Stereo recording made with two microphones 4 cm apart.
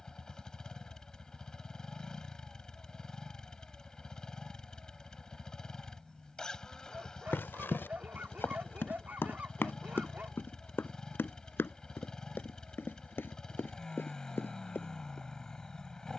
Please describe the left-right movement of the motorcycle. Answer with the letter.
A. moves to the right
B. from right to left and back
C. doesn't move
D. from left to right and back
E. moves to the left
C.